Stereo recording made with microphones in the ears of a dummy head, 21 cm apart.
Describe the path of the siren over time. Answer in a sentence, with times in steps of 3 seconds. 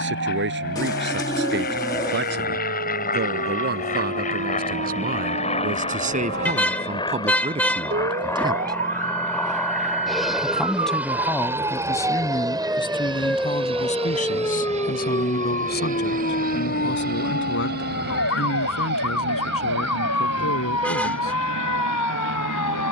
In this clip you hear the siren on the right from 0 s, in the centre from 12 s and on the left from 15 s.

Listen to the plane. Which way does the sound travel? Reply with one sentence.
You can hear the plane travel towards the right.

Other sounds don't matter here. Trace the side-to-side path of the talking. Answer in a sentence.
You can hear the talking move to the left.